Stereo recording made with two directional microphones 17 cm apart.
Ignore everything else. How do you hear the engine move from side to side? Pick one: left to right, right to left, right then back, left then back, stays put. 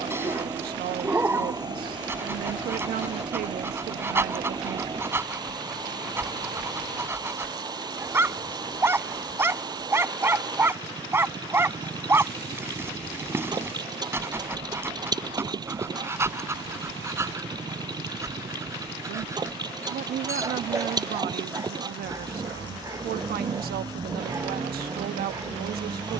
stays put.